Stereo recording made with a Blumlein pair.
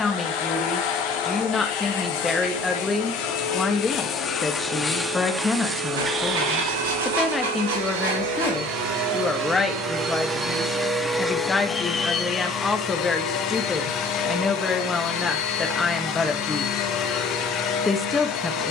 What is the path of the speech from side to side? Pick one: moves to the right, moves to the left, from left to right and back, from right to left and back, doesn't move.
doesn't move.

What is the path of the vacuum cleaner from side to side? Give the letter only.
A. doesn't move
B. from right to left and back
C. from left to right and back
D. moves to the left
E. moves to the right
C.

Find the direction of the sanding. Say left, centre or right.
right.